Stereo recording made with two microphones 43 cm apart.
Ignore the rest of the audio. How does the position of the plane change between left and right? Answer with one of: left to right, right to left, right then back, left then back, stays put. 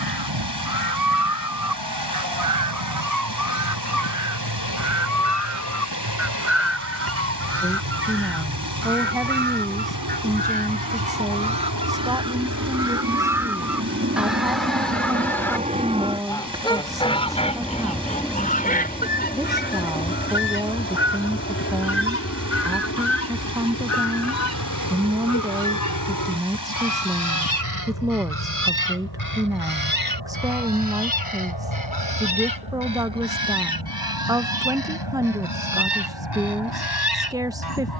right to left.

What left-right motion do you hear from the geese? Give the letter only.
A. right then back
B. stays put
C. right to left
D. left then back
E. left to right
C.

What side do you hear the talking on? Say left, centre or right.
centre.